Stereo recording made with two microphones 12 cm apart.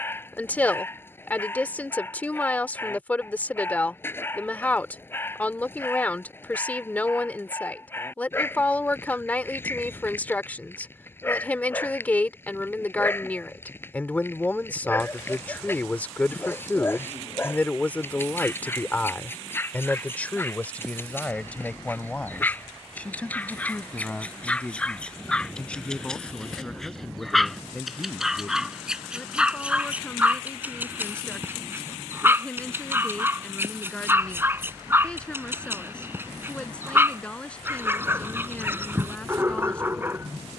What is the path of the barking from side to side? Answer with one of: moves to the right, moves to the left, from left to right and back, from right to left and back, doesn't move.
moves to the right.